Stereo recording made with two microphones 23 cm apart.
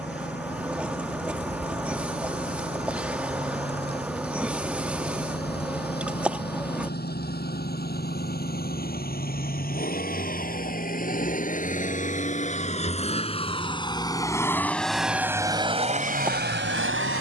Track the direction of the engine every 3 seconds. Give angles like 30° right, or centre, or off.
50° left, 50° left, 50° left, 40° left, 20° left, 40° right.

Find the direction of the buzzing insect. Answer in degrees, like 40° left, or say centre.
10° right.